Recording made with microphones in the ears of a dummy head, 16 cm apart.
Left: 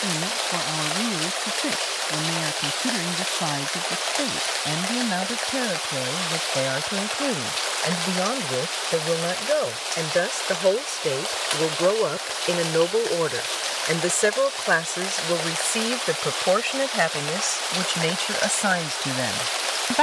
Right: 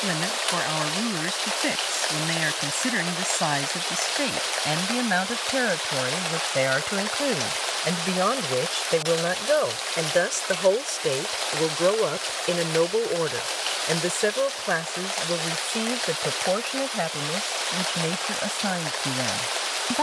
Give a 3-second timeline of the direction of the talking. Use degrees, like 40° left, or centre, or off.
60° right, 60° right, 50° right, 20° right, 10° left, 40° left, 50° left.